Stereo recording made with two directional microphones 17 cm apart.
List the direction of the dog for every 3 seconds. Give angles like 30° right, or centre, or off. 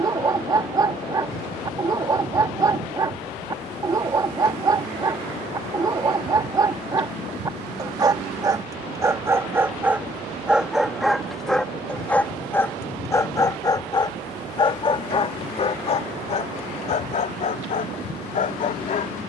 20° right, 20° right, 20° right, 10° right, 20° left, 40° left, 50° left.